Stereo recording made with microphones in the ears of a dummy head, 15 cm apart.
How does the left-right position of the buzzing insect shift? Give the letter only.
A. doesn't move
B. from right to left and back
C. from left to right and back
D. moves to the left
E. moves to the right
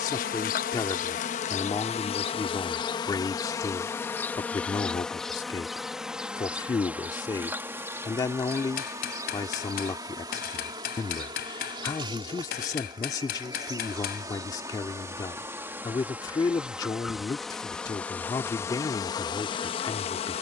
C.